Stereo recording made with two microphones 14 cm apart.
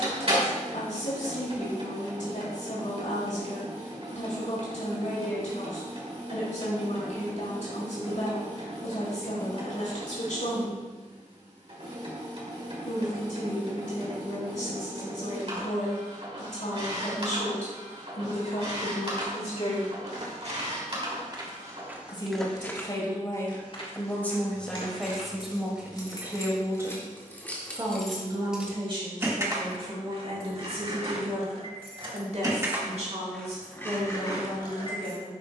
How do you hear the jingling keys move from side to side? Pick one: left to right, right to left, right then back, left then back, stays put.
right then back.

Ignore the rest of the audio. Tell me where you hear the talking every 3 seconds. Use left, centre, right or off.
left, left, left, left, left, left, left, left, centre, right, right, right.